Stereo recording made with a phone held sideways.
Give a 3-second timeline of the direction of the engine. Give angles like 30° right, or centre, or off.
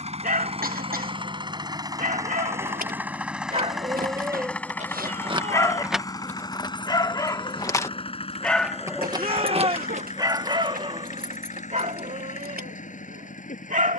30° right, 10° left, 30° left, 50° left, 50° left.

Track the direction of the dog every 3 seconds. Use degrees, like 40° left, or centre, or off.
60° right, 10° right, 20° left, 30° right, 60° right.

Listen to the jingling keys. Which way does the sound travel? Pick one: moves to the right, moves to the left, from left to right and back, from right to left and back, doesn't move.
from right to left and back.